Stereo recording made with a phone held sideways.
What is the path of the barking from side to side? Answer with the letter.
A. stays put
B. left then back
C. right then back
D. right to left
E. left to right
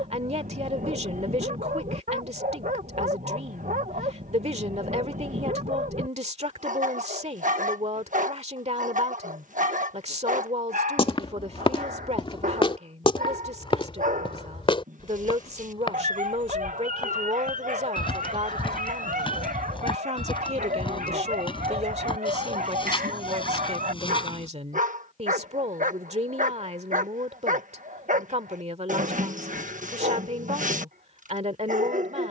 A.